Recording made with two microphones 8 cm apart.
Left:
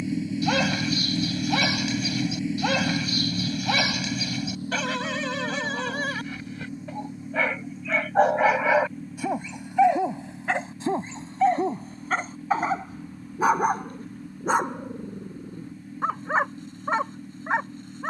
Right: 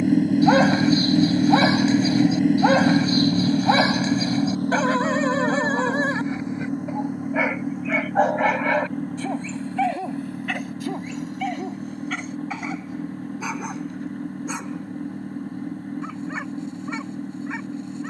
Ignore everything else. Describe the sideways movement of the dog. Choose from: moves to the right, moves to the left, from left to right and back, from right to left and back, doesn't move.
moves to the left.